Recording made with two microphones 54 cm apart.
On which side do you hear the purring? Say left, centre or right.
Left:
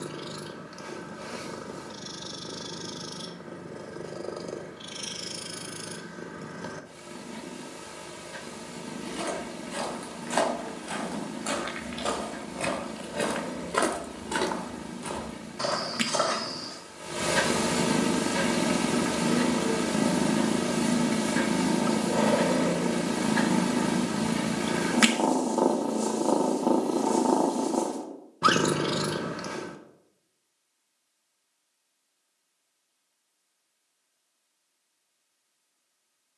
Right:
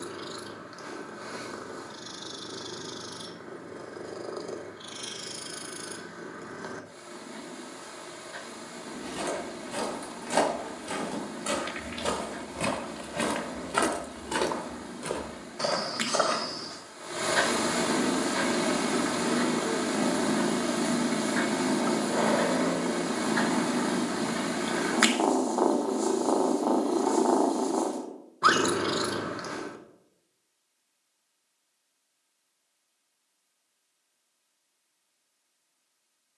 left.